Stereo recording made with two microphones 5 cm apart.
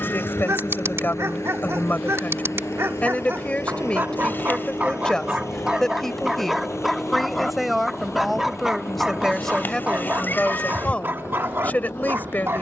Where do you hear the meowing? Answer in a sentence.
In this clip you hear the meowing on the left.